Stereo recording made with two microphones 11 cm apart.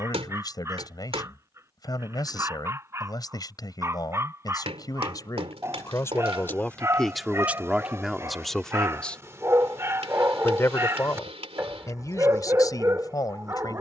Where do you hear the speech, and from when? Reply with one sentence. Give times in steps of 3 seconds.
In this clip you hear the speech on the left from 0 s, in the centre from 6 s and on the left from 9 s.